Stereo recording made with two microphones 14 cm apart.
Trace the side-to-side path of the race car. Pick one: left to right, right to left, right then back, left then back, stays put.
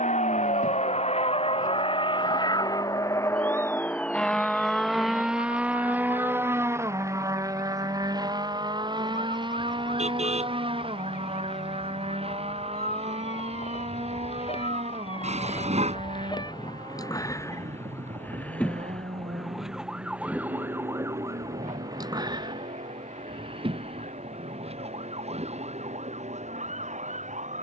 left to right.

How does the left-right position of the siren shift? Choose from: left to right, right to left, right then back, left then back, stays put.
left to right.